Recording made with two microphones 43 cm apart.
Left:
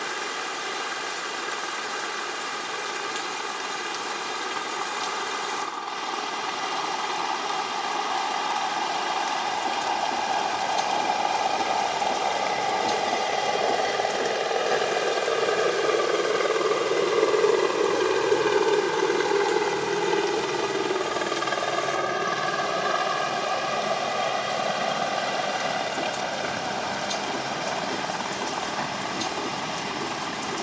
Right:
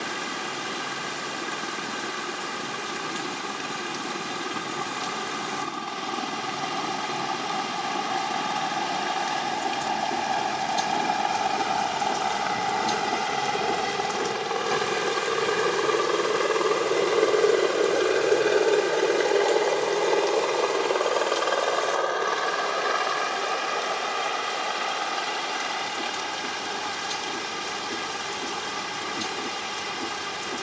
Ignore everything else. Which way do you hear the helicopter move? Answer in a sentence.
You can hear the helicopter move from right to left.